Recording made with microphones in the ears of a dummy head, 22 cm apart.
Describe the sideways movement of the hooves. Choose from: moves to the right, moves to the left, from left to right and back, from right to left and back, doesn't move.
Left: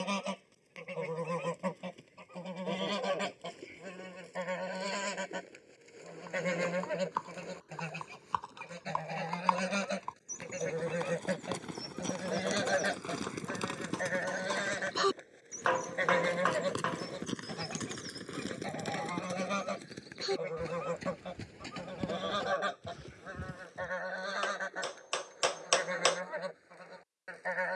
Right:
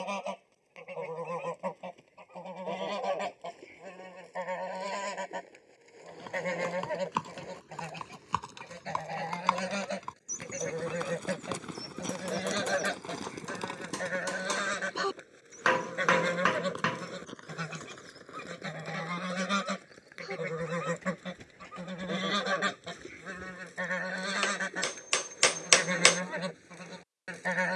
moves to the left.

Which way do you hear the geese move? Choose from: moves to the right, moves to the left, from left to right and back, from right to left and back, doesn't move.
moves to the right.